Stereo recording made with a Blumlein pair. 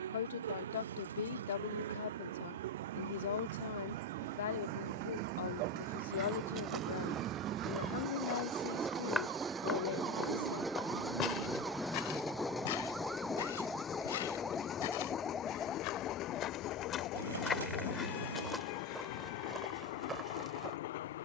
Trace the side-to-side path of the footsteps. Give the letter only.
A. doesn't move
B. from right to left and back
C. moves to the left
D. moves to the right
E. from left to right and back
B.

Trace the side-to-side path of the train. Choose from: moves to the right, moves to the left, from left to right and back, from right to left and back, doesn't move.
moves to the left.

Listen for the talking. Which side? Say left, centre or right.
left.